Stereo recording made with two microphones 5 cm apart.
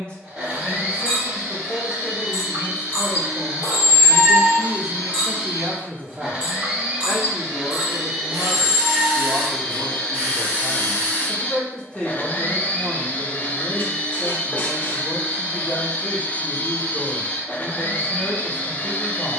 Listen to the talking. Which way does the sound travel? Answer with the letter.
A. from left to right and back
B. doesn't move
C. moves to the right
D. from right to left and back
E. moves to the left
A.